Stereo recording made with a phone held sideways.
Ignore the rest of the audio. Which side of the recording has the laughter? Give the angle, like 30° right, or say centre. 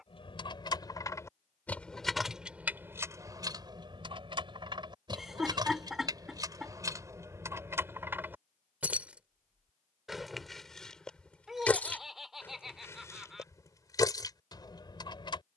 centre.